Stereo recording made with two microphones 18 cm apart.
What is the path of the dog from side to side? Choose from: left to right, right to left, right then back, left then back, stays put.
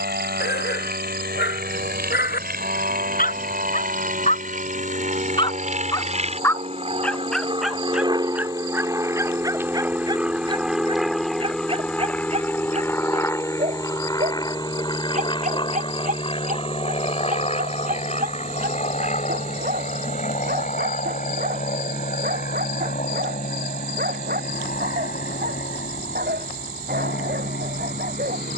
left to right.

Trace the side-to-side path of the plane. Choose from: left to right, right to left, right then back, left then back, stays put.
right to left.